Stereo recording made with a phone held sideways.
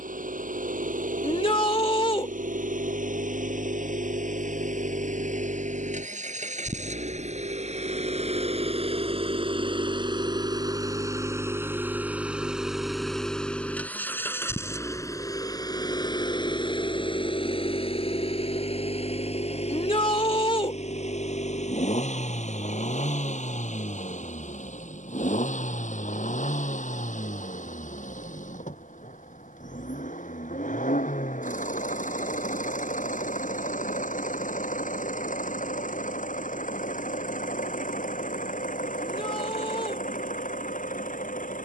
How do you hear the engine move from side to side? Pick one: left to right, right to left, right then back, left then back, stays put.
right to left.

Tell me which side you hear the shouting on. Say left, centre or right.
left.